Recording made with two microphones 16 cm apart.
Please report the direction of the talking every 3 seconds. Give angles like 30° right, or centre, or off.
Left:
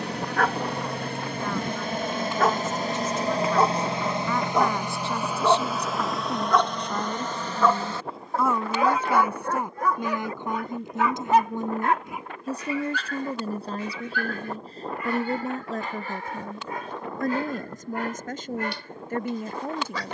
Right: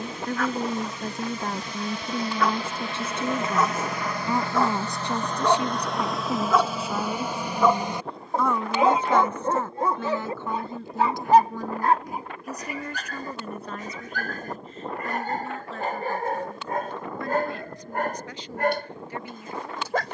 40° right, 20° right, centre, 20° left, 30° left, 40° left, 50° left.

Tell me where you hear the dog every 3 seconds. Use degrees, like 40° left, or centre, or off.
50° left, 20° left, 10° right, 30° right, 40° right, 50° right, 50° right.